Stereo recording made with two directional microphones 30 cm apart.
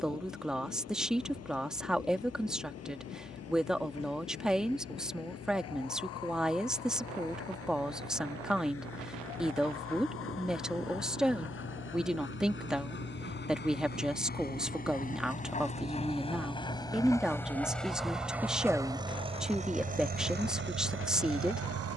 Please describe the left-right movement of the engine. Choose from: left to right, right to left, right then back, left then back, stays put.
left to right.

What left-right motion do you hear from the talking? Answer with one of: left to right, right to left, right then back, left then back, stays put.
stays put.